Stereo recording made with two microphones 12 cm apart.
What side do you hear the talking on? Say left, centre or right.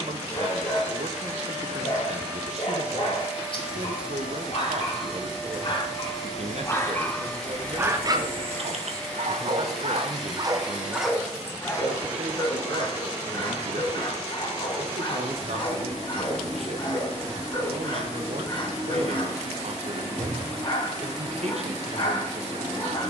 right.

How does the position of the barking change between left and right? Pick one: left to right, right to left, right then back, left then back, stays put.
right then back.